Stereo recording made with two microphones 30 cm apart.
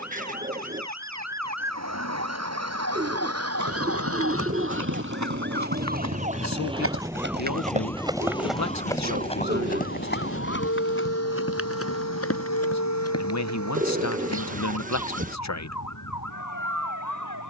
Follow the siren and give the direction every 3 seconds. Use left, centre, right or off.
right, right, centre, left, left, left.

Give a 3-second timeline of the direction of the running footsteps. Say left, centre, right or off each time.
off, right, right, left, left, off.